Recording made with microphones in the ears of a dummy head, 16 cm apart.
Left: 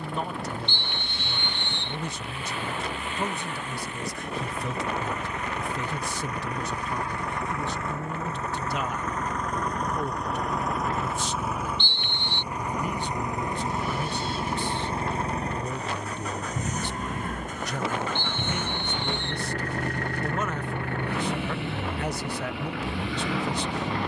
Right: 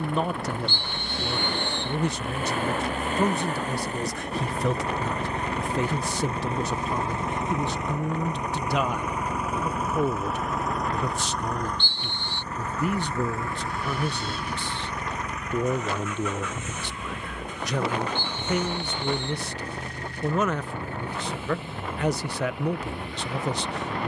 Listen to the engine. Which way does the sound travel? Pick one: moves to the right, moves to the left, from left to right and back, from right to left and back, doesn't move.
moves to the left.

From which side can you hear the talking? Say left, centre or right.
right.